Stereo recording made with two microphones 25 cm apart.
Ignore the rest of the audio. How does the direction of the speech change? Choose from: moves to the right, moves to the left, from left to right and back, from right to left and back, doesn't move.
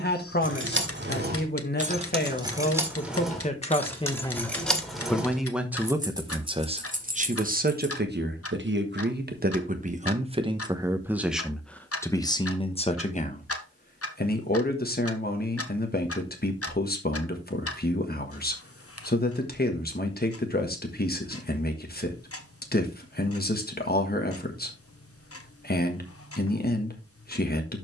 from left to right and back.